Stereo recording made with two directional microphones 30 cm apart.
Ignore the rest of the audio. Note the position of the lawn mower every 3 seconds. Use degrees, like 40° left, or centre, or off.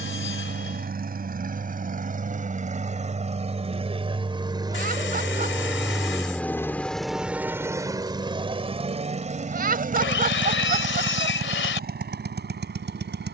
30° right, 10° right, 10° right, 30° right, 40° right.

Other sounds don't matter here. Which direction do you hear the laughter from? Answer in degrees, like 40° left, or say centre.
30° right.